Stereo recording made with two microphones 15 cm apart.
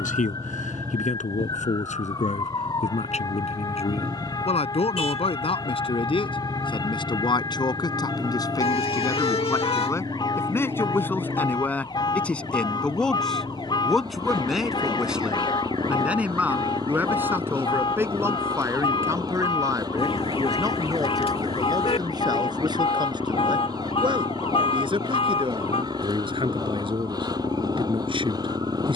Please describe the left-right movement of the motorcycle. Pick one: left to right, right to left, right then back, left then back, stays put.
stays put.